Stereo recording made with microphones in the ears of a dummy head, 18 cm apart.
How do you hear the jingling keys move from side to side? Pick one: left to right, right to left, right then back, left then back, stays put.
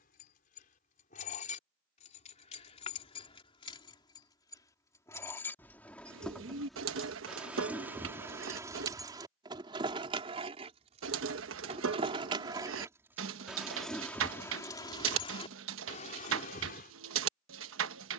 right then back.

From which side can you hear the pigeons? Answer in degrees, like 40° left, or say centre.
70° right.